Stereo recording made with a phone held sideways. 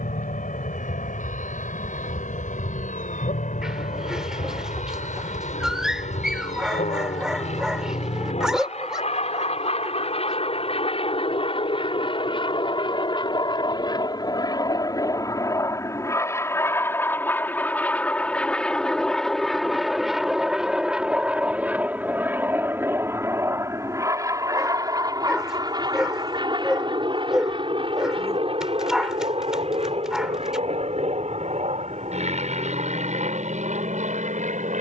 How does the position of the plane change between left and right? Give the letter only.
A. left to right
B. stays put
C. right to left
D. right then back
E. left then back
A.